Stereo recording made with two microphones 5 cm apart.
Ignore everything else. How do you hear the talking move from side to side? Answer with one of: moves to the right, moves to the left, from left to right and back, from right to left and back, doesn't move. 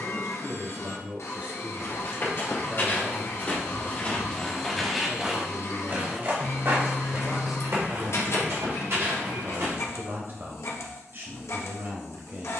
from right to left and back.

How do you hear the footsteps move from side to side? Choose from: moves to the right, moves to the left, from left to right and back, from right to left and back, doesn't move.
moves to the right.